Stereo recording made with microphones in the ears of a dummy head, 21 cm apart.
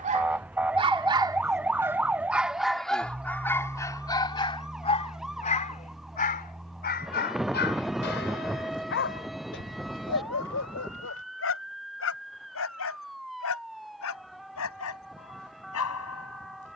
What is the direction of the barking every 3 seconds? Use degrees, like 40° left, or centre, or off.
10° right, 20° left, 50° left, 60° left, 60° left, 70° left.